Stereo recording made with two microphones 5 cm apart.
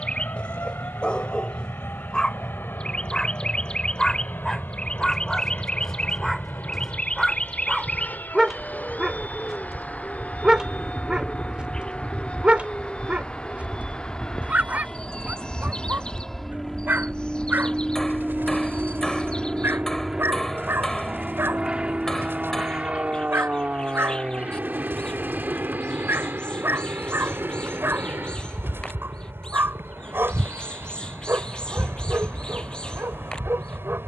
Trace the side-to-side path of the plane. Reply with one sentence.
In this clip you hear the plane travel towards the right.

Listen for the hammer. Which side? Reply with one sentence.
In this clip you hear the hammer in the centre.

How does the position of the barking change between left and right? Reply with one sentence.
In this clip you hear the barking move to the right.